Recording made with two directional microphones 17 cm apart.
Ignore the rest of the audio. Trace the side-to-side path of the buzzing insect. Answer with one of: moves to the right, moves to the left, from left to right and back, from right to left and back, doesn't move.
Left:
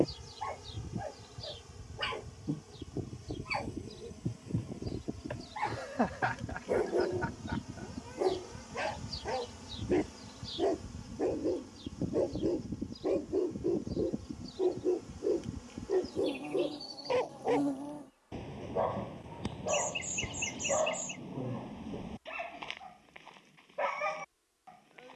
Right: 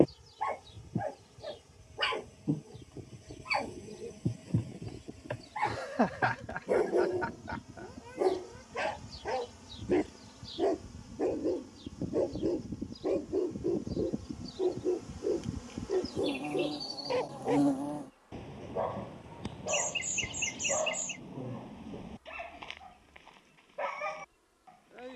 moves to the right.